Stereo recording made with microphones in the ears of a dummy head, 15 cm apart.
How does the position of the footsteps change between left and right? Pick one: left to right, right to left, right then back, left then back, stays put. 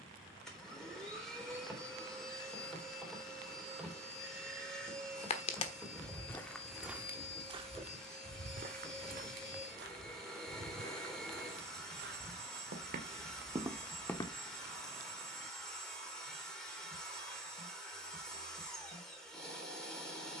right then back.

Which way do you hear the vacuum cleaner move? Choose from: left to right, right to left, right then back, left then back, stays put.
stays put.